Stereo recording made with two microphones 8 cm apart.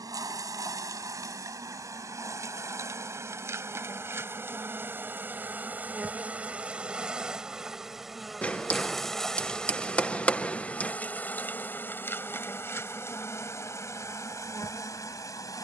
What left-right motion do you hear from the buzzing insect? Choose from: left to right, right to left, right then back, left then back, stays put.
right to left.